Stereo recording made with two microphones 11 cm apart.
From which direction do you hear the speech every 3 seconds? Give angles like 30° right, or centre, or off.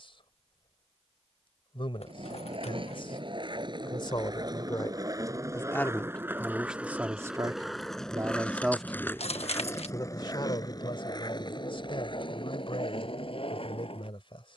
50° left, 40° left, 10° right, 40° left, 50° left.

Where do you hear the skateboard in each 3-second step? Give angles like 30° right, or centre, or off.
50° right, 30° right, centre, 30° left, 50° left.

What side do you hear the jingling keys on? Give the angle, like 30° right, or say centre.
60° left.